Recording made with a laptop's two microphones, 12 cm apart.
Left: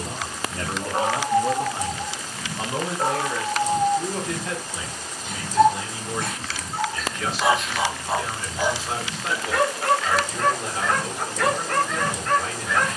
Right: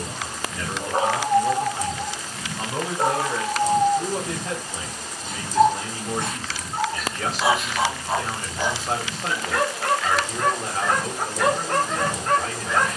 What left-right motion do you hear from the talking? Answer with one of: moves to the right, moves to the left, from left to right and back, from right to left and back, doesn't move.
moves to the right.